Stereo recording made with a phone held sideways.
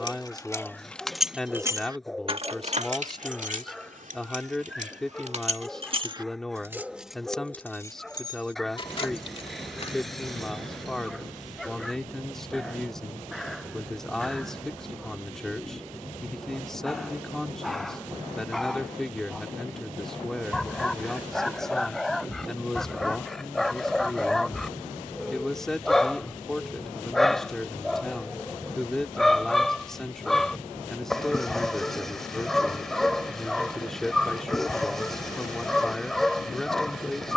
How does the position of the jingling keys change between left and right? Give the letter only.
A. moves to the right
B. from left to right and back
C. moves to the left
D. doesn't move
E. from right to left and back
B.